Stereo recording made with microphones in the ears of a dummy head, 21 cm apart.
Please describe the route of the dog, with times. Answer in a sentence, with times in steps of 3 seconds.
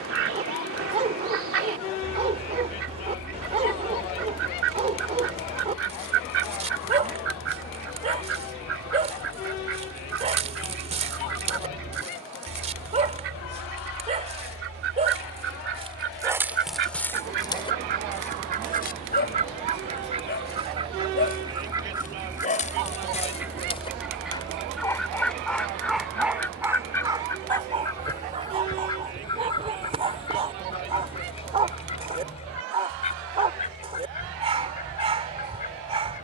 You can hear the dog on the right from 0 s, in the centre from 15 s, on the left from 18 s, in the centre from 24 s and on the right from 27 s.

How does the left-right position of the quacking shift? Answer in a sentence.
You can hear the quacking travel towards the left.